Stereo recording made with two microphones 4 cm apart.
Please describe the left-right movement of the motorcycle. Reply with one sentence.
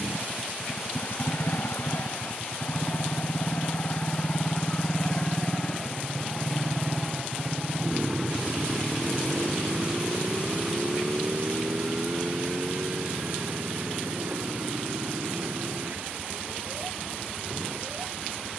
You can hear the motorcycle go from the left side to the right.